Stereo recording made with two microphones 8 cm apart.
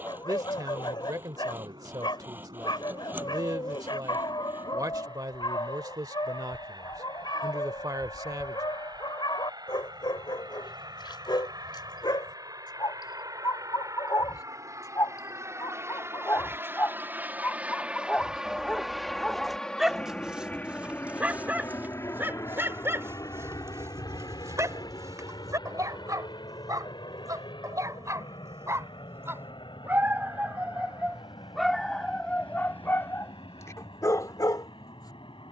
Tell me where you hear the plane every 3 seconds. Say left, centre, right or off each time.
right, right, right, right, right, right, centre, left, left, left, left, left.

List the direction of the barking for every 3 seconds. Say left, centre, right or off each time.
left, left, left, left, left, left, centre, right, right, right, centre, left.